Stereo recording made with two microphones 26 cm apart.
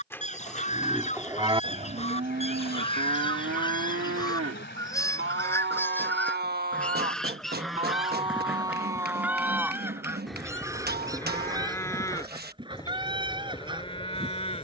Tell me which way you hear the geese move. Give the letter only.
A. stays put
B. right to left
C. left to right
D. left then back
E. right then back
C.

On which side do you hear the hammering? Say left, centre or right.
right.